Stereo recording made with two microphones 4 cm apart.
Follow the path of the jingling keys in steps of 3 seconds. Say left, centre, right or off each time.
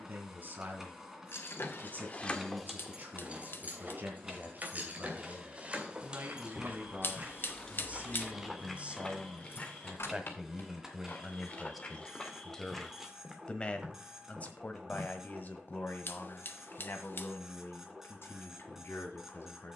left, right, centre, left, off, off, off.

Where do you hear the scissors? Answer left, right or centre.
left.